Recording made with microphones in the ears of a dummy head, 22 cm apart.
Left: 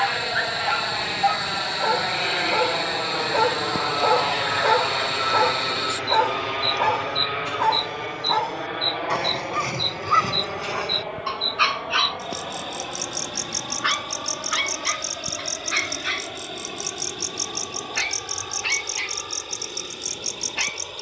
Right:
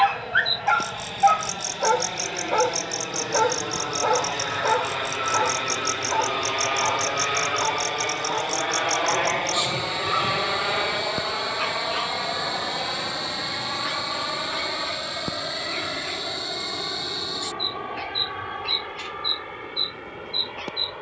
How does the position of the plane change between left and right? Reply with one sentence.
In this clip you hear the plane move from left to right.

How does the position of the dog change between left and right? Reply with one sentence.
In this clip you hear the dog move from right to left.